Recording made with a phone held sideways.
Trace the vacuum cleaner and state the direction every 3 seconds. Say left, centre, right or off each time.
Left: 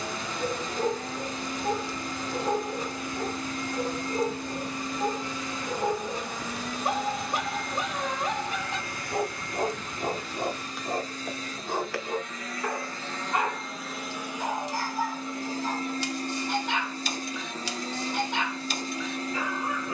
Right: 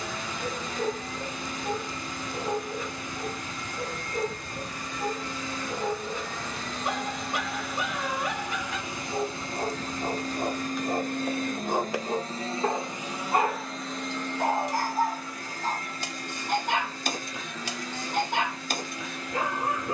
left, left, centre, right, centre, left, left.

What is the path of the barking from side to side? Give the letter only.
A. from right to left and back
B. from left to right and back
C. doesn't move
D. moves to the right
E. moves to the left
D.